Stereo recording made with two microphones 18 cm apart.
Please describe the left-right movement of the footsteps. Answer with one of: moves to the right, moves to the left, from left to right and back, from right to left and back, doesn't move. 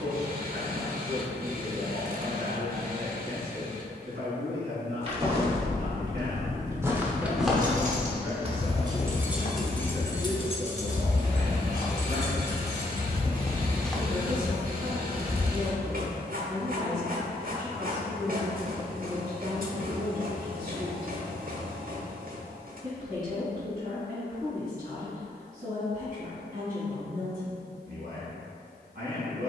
from right to left and back.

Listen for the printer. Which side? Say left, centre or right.
right.